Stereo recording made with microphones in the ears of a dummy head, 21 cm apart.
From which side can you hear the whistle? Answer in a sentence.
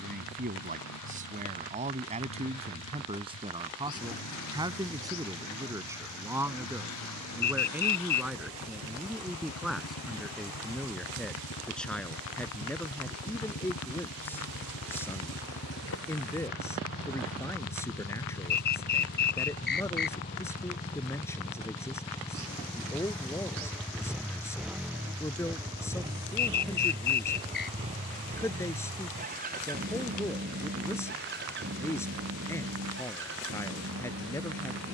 You can hear the whistle on the left.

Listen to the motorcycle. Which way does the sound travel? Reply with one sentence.
In this clip you hear the motorcycle go from the left side to the right.